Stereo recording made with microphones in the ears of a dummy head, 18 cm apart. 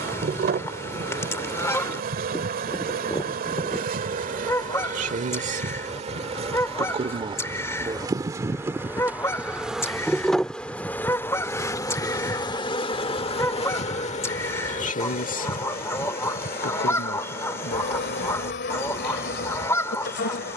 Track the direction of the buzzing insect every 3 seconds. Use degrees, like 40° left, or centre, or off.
50° right, 40° right, 20° right, 10° left, 30° left, 50° left, 60° left.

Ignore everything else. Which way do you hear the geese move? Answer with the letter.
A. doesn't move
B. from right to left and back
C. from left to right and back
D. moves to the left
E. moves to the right
A.